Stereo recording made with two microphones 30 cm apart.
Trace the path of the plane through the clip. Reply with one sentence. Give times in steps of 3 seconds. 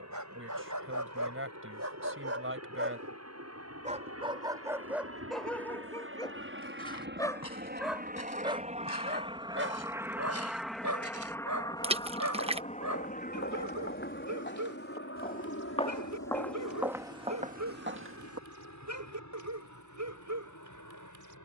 You can hear the plane on the right from 0 s, in the centre from 9 s and on the left from 12 s.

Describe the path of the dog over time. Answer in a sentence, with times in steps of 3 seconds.
In this clip you hear the dog on the right from 0 s, in the centre from 3 s and on the right from 9 s.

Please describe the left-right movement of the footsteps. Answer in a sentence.
You can hear the footsteps travel towards the right.